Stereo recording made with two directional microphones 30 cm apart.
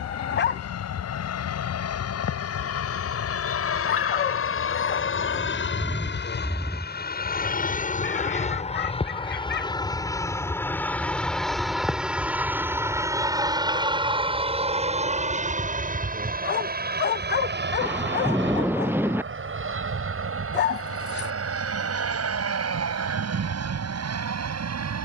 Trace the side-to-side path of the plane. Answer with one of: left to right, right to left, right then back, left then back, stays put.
left to right.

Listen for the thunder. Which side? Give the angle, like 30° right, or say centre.
10° right.